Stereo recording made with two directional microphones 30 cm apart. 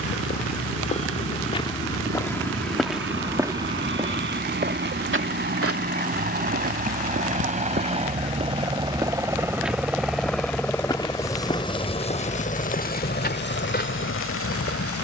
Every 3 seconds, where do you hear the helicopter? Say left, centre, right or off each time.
right, right, right, centre, left.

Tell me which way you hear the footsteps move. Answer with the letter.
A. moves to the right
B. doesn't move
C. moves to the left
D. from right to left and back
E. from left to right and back
E.